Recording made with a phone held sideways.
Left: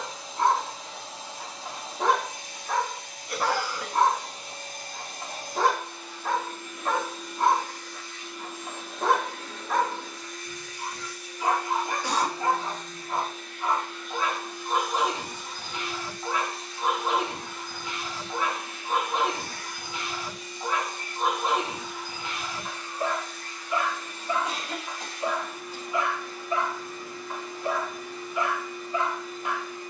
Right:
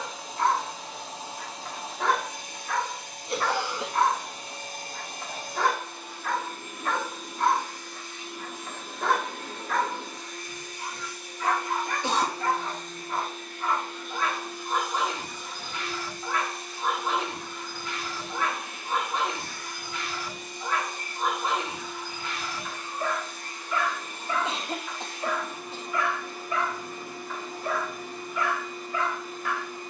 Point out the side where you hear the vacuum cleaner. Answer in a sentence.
In this clip you hear the vacuum cleaner on the right.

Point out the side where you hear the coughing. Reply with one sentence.
In this clip you hear the coughing on the right.